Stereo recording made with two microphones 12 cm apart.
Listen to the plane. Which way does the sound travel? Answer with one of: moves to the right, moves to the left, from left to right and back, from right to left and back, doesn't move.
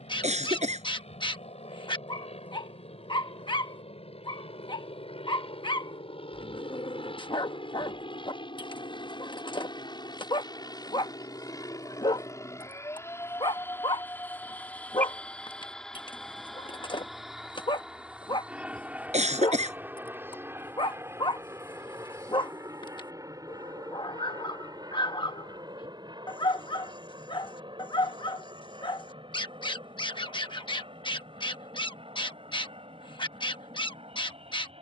moves to the right.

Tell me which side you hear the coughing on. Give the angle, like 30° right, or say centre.
80° right.